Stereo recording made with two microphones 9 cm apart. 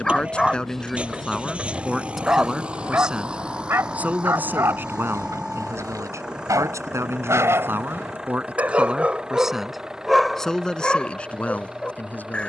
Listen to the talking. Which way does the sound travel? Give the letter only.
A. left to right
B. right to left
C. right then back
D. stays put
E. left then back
C.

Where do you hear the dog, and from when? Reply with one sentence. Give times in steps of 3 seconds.
In this clip you hear the dog in the centre from 0 s, on the right from 3 s and in the centre from 9 s.